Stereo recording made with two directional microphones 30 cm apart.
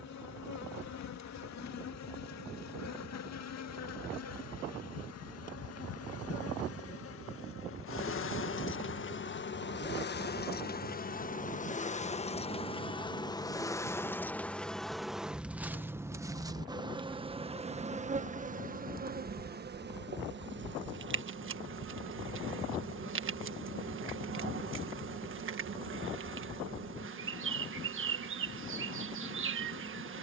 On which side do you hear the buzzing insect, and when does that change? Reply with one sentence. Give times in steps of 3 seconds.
In this clip you hear the buzzing insect on the left from 0 s, in the centre from 12 s and on the right from 18 s.